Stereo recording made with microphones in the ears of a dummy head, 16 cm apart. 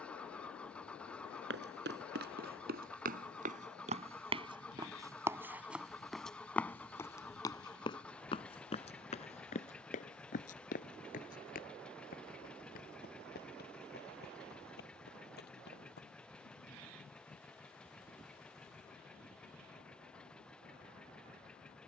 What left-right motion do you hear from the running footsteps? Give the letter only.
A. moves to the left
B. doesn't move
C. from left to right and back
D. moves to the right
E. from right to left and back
A.